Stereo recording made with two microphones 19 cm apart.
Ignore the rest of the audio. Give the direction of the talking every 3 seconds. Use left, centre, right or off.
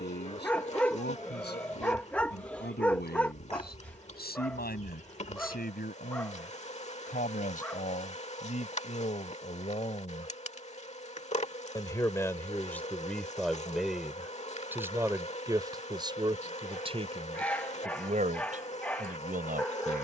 left, left, left, left, centre, right, right.